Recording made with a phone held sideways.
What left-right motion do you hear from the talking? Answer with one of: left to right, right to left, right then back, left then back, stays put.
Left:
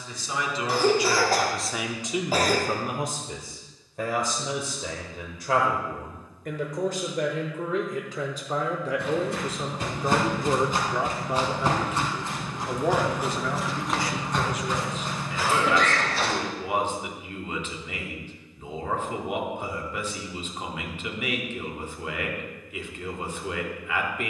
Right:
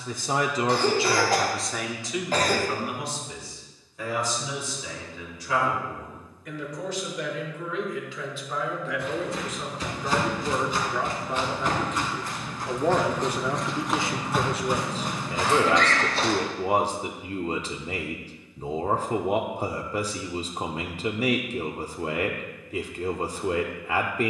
left then back.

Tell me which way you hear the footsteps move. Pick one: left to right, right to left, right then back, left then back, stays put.
left to right.